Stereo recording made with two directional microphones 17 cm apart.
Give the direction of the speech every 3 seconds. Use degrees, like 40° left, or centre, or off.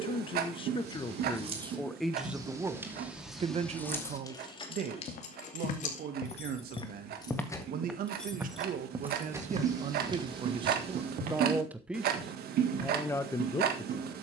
10° left, 50° right, 60° right, 30° right, 10° left.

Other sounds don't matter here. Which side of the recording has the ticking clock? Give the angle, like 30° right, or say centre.
60° right.